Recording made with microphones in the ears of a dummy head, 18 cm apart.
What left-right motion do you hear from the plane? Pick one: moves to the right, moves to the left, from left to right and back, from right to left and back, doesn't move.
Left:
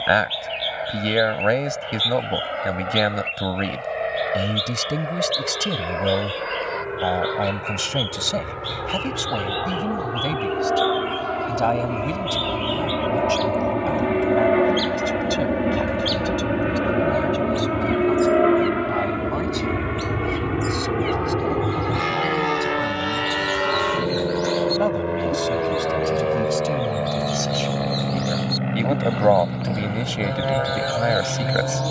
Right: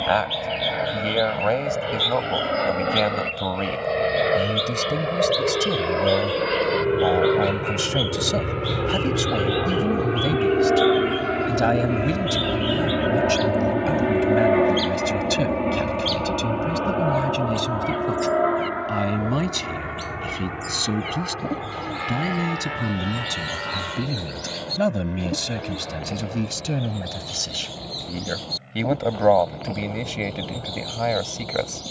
moves to the left.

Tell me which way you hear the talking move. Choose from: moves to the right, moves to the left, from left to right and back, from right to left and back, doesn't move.
from left to right and back.